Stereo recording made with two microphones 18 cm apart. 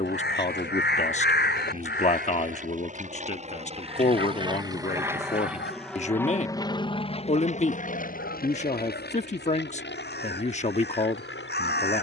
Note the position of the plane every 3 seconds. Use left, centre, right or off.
right, right, left, left.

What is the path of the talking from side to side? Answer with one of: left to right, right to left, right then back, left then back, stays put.
stays put.